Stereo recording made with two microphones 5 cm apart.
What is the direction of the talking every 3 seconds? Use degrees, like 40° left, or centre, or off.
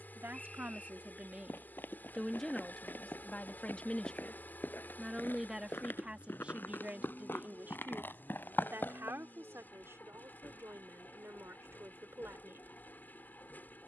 20° right, 10° left, 30° right, 50° right, 50° right.